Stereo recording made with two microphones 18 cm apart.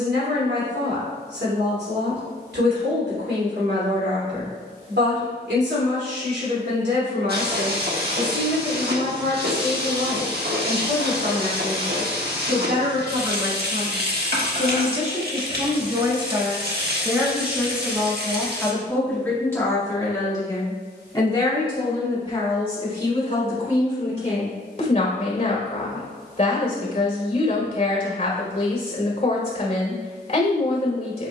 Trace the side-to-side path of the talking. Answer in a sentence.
You can hear the talking go from the right side to the left.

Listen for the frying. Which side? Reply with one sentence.
You can hear the frying on the right.